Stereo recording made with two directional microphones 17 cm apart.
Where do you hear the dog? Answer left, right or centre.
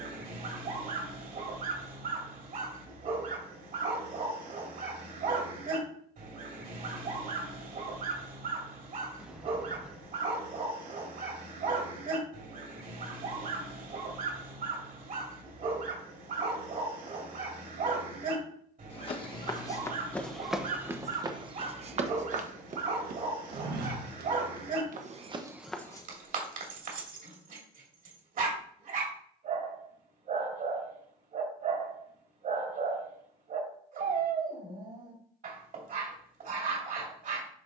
right.